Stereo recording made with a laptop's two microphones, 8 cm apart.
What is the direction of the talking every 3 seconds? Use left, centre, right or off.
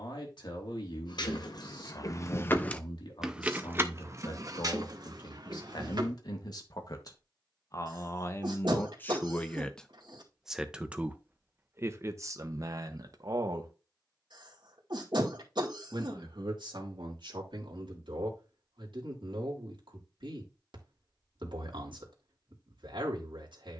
left, left, left, centre, right, right, right, right.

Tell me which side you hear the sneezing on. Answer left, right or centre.
right.